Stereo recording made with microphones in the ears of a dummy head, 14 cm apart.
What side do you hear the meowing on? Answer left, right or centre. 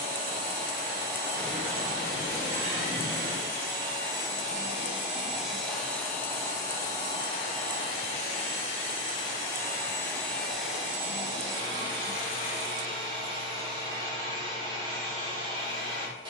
centre.